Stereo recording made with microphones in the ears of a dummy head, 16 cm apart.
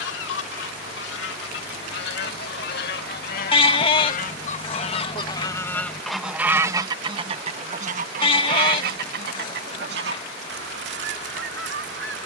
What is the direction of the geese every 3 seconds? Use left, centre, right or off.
left, left, right, right.